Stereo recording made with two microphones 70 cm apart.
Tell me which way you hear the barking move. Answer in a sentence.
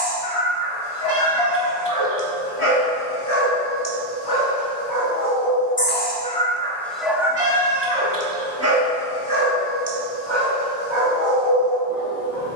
In this clip you hear the barking go from the left side to the right.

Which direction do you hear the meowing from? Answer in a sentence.
In this clip you hear the meowing on the right.